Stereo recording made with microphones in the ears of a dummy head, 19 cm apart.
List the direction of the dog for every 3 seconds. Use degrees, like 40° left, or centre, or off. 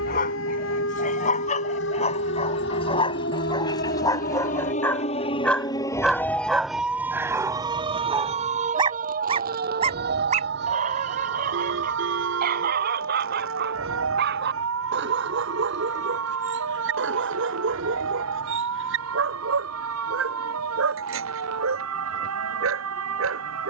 30° left, 20° left, 10° right, 40° right, 50° right, 60° right, 70° right, 70° right.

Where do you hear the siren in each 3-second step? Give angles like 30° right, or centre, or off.
60° left, 40° left, 20° right, 50° right, 70° right, 70° right, 80° right, 80° right.